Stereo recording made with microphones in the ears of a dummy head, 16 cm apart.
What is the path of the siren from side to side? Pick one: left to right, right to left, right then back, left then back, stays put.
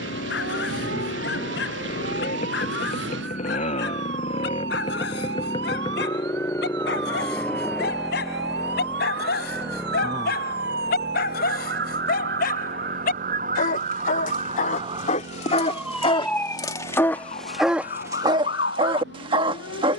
right to left.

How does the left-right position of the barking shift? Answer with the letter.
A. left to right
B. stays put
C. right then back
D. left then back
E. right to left
A.